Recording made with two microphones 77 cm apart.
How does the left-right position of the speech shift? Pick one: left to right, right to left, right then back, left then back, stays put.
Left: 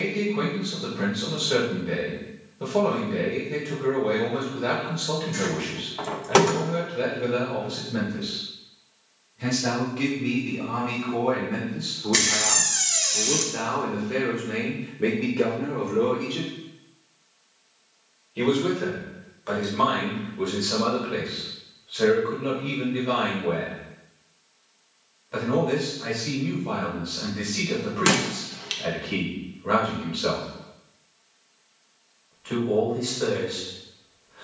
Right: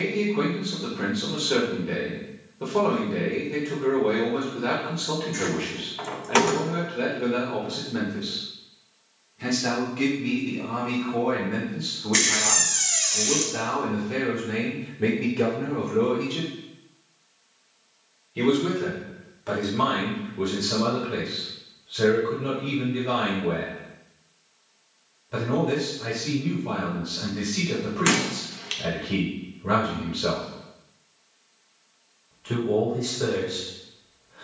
left to right.